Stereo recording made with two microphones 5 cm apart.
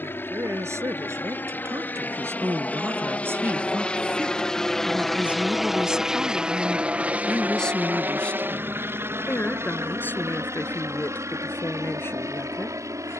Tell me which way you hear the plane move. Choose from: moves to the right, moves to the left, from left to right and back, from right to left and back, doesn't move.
moves to the right.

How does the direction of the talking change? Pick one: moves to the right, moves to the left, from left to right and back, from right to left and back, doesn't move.
moves to the left.